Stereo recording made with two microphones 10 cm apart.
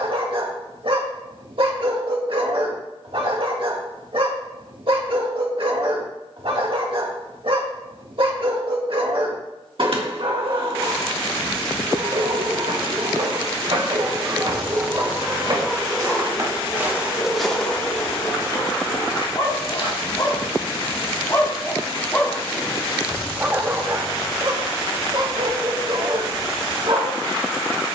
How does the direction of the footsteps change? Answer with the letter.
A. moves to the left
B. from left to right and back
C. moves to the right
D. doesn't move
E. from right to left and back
A.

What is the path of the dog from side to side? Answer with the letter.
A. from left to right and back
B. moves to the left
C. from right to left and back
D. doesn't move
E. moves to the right
C.